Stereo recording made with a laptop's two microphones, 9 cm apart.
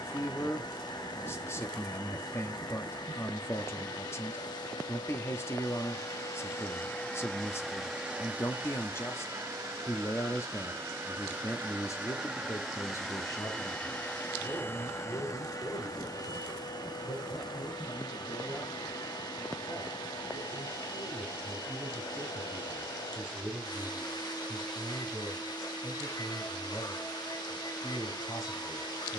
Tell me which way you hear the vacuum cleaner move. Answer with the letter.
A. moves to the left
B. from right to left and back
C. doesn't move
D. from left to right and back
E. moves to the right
D.